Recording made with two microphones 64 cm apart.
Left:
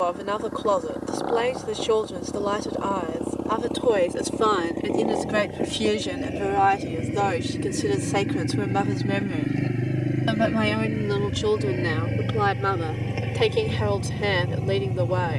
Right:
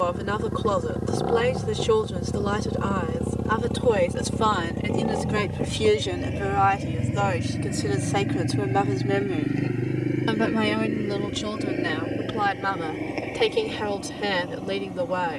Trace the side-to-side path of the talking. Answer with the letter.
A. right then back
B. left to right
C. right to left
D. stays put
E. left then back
E.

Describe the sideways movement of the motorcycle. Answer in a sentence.
In this clip you hear the motorcycle move from right to left.